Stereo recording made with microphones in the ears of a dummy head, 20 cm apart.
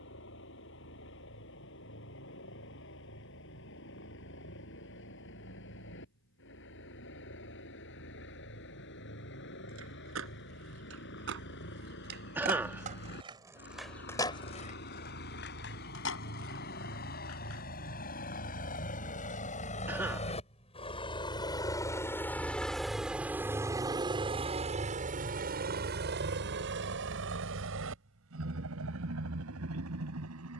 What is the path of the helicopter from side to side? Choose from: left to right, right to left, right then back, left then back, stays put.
left to right.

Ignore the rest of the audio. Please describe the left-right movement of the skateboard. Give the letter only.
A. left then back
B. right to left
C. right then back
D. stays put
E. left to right
B.